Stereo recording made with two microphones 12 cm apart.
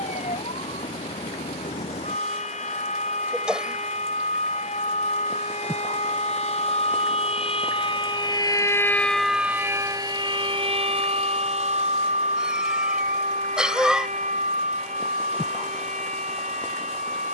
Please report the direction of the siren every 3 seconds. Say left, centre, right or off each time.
left, left, left, right, right, right.